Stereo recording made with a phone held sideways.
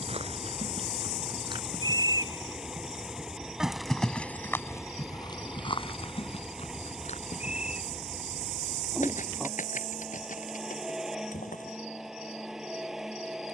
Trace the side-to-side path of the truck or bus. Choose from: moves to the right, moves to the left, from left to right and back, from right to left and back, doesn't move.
doesn't move.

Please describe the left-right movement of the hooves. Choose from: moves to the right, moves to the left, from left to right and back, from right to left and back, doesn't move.
moves to the left.